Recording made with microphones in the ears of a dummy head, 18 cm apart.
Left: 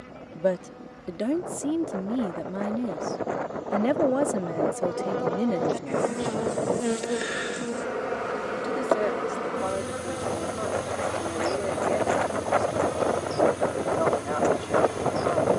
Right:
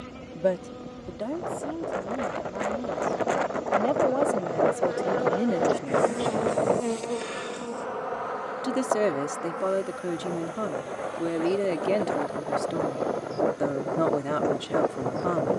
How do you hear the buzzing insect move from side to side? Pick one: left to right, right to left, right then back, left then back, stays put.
right to left.